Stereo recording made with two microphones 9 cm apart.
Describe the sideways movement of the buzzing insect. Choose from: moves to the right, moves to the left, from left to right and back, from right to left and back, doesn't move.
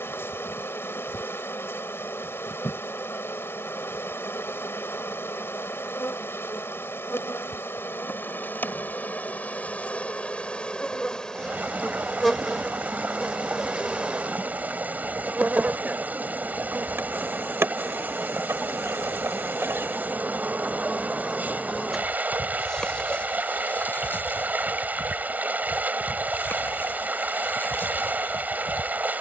from left to right and back.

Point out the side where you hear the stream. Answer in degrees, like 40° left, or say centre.
20° right.